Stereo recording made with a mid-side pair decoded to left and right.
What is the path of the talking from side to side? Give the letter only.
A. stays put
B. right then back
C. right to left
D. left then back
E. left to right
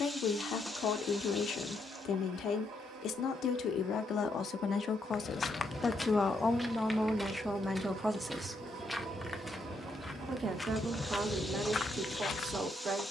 E.